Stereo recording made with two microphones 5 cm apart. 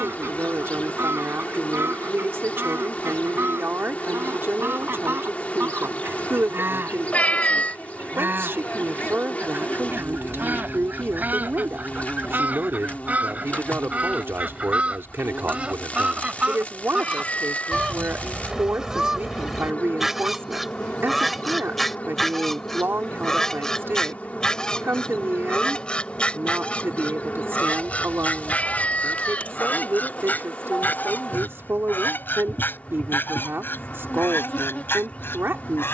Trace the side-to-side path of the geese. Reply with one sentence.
You can hear the geese move to the left.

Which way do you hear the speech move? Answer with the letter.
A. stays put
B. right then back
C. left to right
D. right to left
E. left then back
A.